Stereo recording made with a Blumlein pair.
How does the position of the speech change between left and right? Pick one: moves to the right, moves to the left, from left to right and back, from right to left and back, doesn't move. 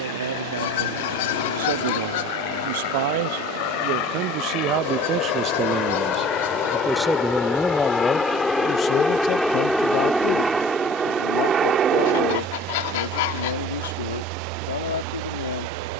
moves to the left.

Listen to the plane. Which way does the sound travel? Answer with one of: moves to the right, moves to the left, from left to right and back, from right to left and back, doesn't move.
moves to the right.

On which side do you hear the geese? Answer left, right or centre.
left.